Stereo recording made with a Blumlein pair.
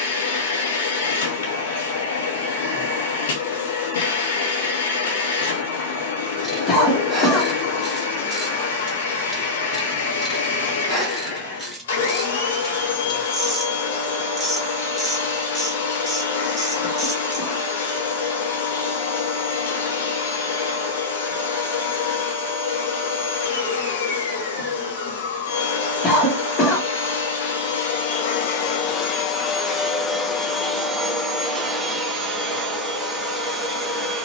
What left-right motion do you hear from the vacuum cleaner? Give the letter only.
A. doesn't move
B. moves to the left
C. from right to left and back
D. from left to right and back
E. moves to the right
E.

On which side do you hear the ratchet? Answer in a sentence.
You can hear the ratchet in the centre.